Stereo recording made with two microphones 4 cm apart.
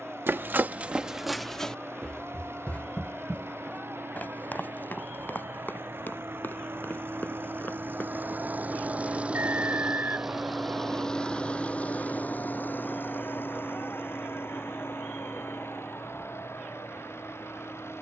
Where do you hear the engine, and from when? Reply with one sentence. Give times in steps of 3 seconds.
In this clip you hear the engine on the right from 0 s, in the centre from 9 s and on the left from 12 s.